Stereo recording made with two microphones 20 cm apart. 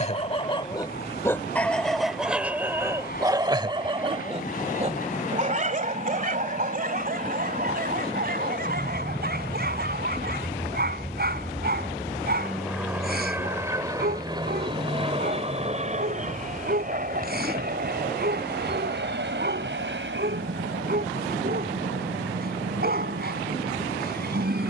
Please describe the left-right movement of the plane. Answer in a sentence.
In this clip you hear the plane move to the right.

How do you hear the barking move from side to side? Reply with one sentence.
You can hear the barking go from the left side to the right.